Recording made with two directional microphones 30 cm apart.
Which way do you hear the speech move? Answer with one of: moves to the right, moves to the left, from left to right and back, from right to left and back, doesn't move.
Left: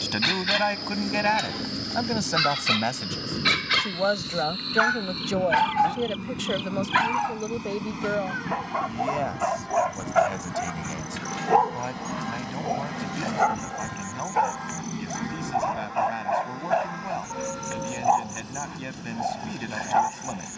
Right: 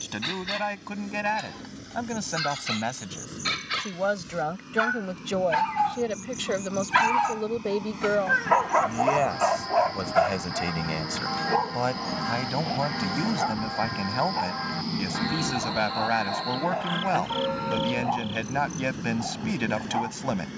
moves to the right.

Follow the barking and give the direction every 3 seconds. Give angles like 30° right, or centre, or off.
40° left, 20° left, 30° right, centre, 40° left, 40° left, 40° left.